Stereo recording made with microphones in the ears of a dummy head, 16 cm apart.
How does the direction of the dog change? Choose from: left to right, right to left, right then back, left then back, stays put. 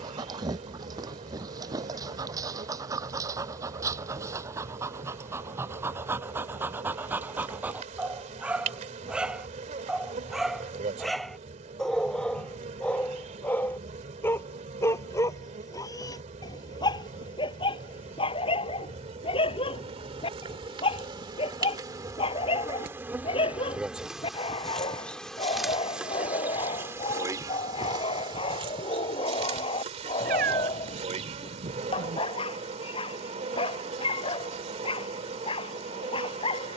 right to left.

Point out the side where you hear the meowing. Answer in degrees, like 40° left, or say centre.
50° right.